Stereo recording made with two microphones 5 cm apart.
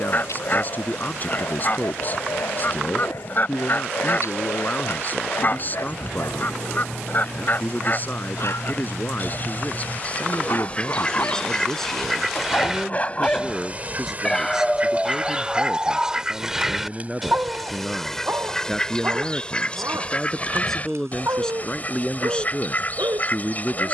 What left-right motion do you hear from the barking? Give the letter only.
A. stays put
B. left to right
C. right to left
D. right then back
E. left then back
B.